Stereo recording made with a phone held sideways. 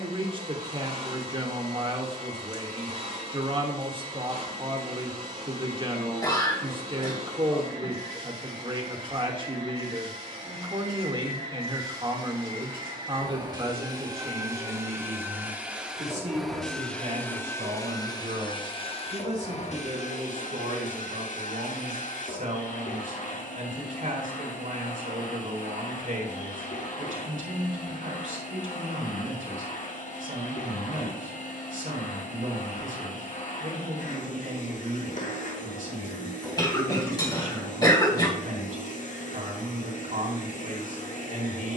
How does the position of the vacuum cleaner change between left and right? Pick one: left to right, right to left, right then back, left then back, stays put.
right to left.